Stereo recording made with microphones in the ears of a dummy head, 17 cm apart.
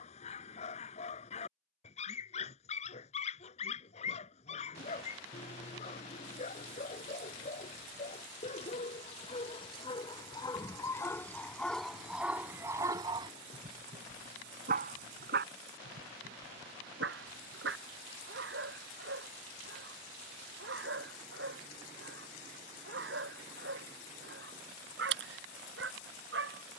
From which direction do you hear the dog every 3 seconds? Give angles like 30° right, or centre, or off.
40° left, 40° left, 40° left, 20° left, 30° right, 70° right, 70° right, 70° right, 70° right.